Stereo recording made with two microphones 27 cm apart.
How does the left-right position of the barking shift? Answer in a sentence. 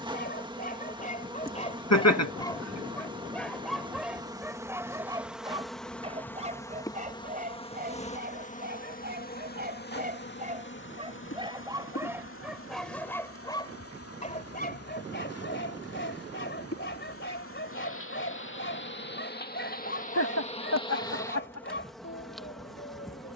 In this clip you hear the barking go right and come back.